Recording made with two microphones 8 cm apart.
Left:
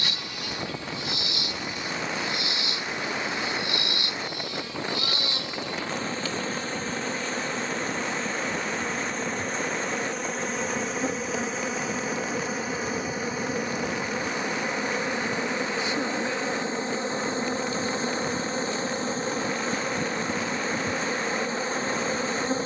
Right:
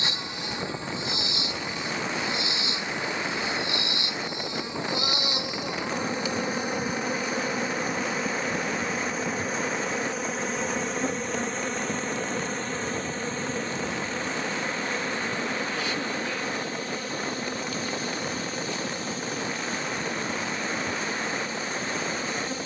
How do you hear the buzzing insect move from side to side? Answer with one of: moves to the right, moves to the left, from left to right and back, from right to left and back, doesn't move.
moves to the left.